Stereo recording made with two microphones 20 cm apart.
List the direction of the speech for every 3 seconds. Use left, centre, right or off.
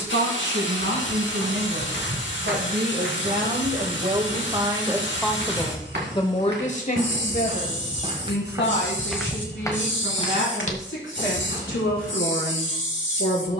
right, right, left, left, left.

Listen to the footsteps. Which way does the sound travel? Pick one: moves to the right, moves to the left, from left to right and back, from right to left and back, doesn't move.
moves to the left.